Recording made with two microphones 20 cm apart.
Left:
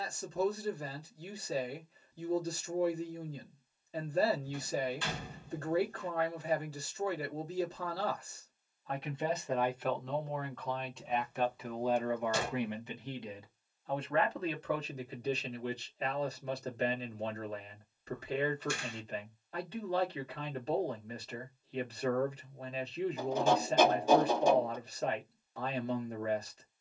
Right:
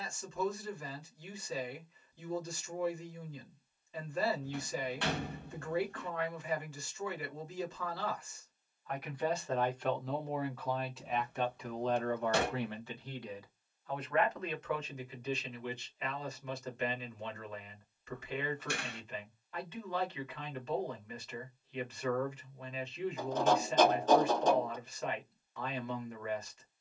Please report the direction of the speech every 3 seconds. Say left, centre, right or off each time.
left, left, left, centre, left, left, left, left, left.